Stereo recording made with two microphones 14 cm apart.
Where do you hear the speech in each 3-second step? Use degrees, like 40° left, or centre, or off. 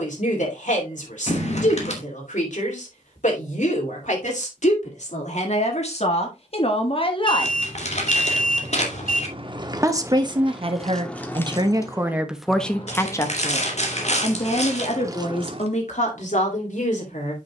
60° left, 60° left, 40° left, 30° right, 20° left, 60° left.